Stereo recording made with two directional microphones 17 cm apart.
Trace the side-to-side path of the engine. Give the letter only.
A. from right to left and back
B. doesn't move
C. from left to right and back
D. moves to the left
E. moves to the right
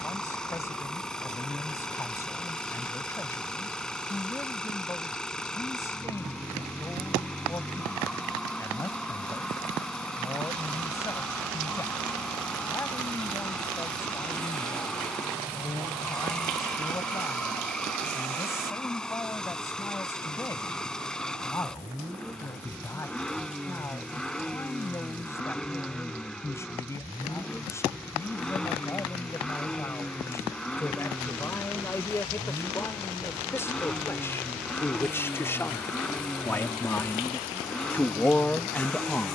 B.